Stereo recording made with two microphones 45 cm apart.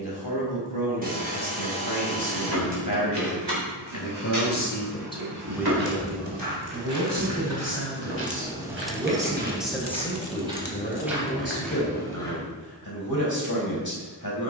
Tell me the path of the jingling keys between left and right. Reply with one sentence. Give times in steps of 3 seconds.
In this clip you hear the jingling keys on the right from 0 s, on the left from 9 s and not at all from 12 s.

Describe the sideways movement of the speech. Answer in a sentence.
You can hear the speech move from left to right and back again.